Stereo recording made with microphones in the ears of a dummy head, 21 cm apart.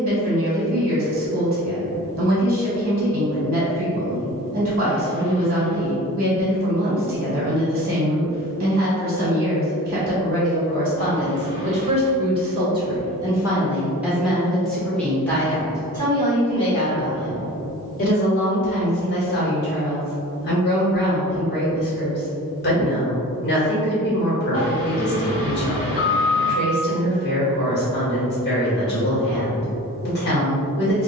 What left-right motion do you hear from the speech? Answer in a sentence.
You can hear the speech travel towards the left.